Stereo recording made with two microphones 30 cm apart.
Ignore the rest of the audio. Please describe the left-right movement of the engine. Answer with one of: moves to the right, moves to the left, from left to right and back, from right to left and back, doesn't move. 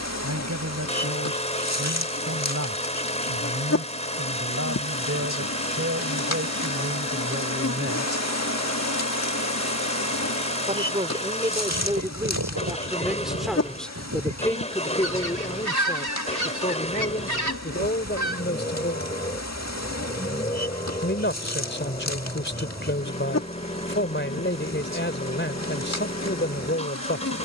doesn't move.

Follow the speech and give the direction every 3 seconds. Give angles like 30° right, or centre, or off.
60° right, 50° right, 40° right, 20° right, centre, 20° left, 40° left, 40° left, 40° left.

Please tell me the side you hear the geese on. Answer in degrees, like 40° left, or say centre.
80° right.